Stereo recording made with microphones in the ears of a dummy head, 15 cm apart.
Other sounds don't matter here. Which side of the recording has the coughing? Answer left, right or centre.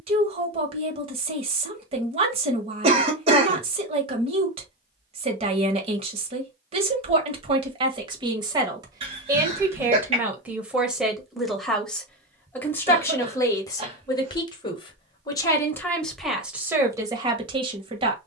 right.